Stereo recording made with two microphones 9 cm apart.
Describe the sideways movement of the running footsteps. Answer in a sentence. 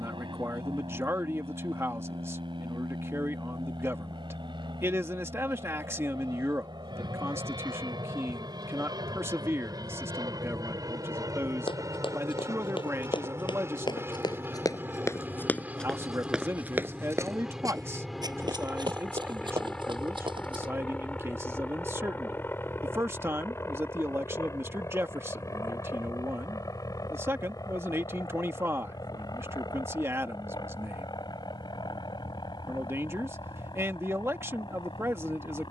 In this clip you hear the running footsteps travel towards the right.